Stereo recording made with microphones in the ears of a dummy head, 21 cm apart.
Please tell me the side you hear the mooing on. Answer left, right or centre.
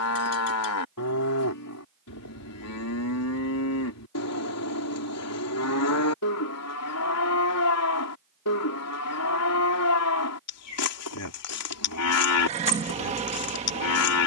left.